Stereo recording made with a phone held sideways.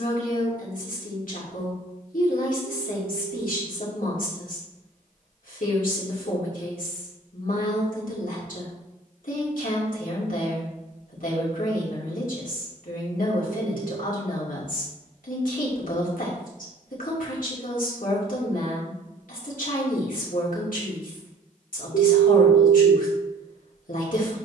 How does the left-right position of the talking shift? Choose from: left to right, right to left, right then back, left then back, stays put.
stays put.